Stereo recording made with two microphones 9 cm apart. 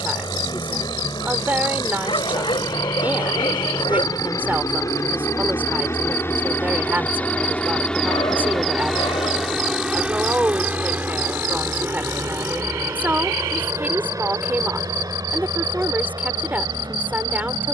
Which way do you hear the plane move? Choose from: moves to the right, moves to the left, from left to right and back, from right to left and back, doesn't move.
moves to the right.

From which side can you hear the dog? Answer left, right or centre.
left.